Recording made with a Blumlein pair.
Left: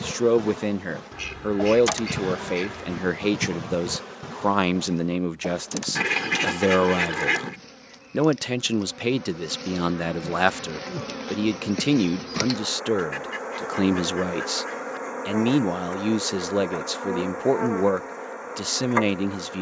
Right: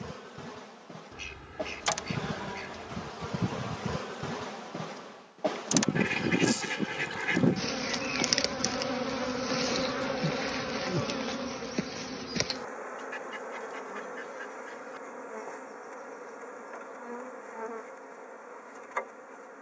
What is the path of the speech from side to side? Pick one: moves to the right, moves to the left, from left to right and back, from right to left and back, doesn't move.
doesn't move.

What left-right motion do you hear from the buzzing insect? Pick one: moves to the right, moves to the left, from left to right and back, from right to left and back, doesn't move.
from left to right and back.